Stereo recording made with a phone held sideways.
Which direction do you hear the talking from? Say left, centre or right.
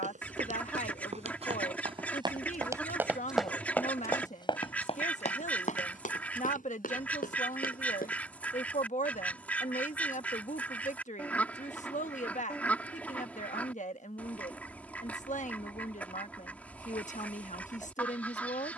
left.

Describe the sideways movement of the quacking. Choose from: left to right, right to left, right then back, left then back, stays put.
stays put.